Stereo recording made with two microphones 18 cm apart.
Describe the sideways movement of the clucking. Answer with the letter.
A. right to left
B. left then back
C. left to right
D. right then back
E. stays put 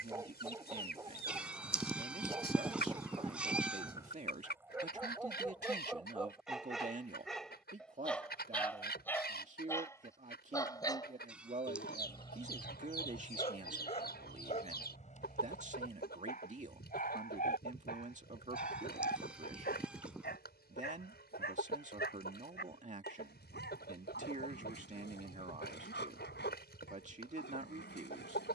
E.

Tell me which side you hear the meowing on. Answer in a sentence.
In this clip you hear the meowing in the centre.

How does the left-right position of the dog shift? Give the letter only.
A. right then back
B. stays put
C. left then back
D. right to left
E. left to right
D.